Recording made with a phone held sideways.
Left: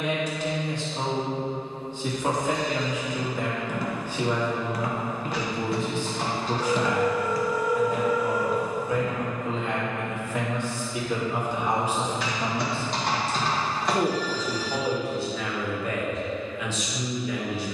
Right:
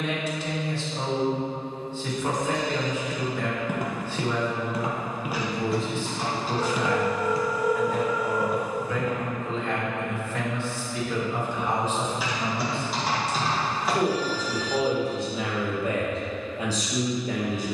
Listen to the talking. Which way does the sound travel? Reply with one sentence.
You can hear the talking go from the left side to the right.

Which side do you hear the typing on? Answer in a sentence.
You can hear the typing in the centre.